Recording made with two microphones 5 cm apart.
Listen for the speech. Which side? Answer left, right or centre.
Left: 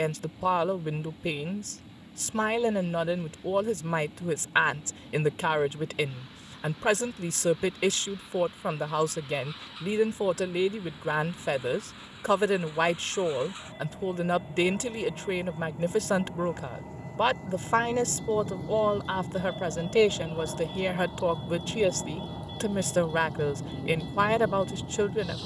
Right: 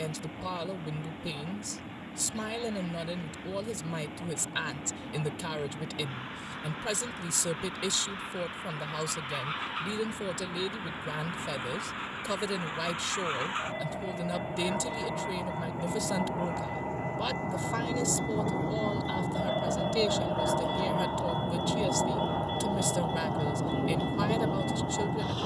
left.